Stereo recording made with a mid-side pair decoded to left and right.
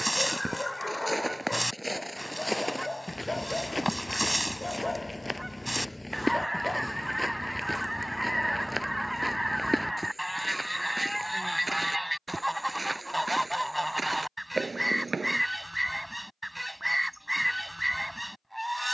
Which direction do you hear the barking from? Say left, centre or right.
centre.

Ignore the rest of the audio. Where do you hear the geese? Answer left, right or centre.
centre.